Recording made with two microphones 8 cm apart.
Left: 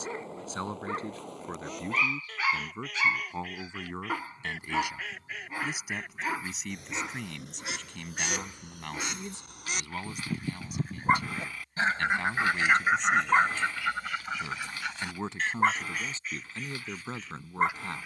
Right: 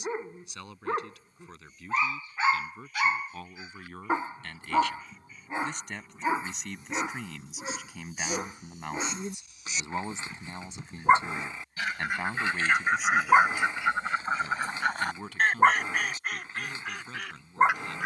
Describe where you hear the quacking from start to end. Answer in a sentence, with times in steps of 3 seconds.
You can hear the quacking on the left from 0 s, in the centre from 12 s and on the right from 15 s.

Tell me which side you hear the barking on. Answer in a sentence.
You can hear the barking on the right.